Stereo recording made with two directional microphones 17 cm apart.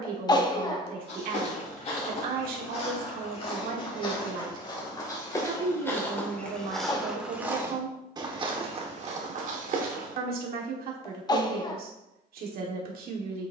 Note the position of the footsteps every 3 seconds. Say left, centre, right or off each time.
left, left, centre, right, off.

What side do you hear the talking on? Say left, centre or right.
right.